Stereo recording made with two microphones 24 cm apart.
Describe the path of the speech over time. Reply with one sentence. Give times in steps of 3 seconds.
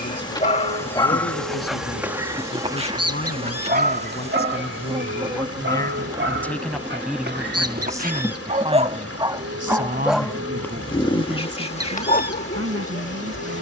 In this clip you hear the speech on the left from 0 s, in the centre from 6 s and on the right from 9 s.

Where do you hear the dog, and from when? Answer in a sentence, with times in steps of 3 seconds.
You can hear the dog in the centre from 0 s, on the right from 3 s, in the centre from 9 s and on the left from 12 s.